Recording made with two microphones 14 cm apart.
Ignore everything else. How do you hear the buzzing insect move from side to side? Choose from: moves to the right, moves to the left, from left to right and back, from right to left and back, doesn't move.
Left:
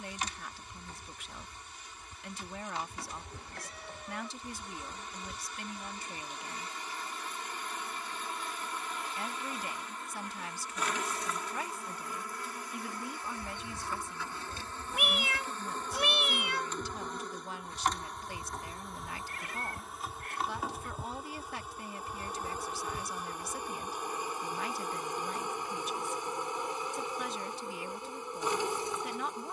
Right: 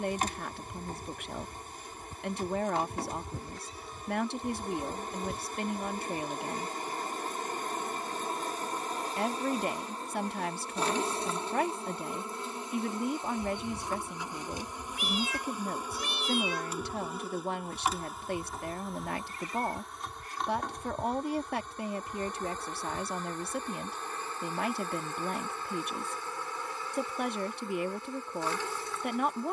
moves to the left.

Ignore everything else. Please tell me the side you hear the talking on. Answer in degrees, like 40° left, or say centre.
60° right.